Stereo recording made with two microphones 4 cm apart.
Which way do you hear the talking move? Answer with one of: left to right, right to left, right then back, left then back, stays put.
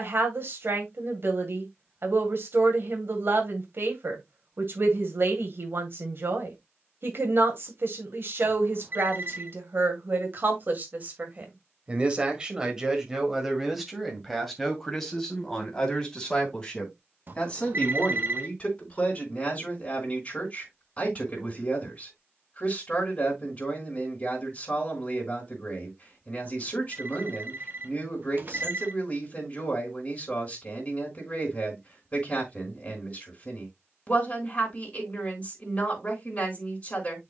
right to left.